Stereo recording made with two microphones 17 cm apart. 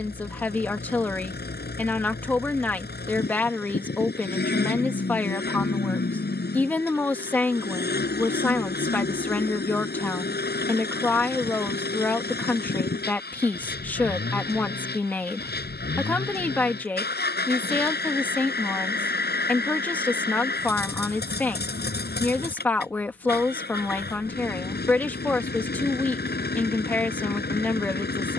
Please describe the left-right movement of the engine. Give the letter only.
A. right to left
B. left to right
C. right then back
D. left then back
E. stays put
E.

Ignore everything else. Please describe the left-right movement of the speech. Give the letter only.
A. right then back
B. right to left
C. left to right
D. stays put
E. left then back
D.